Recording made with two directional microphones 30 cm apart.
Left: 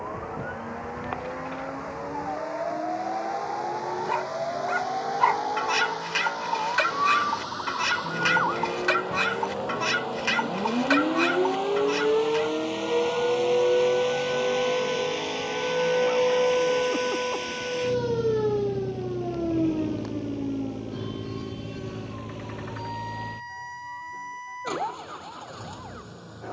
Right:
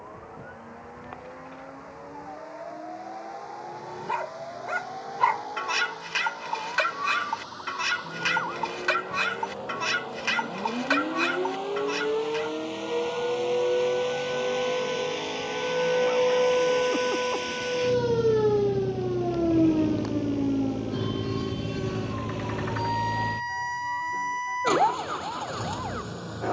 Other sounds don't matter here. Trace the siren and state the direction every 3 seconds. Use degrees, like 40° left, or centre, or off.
60° left, 60° left, 50° left, 40° left, 20° left, centre, 30° right, 50° right, 60° right.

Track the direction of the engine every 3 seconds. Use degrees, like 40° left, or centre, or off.
60° left, 50° left, 50° left, 40° left, 20° left, centre, 20° right, 40° right, 50° right.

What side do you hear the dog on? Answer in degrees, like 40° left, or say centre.
10° left.